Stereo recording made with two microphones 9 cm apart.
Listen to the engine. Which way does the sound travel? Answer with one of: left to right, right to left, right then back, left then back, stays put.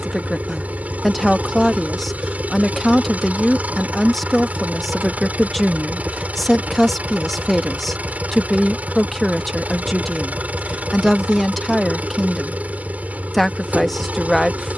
stays put.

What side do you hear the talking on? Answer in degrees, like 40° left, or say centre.
centre.